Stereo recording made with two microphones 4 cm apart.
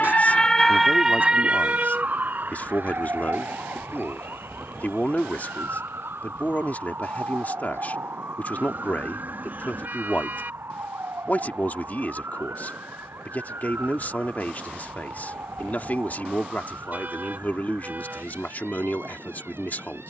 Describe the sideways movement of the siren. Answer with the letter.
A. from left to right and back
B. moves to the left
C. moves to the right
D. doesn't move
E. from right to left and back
C.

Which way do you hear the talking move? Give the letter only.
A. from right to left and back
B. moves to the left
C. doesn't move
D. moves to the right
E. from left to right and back
C.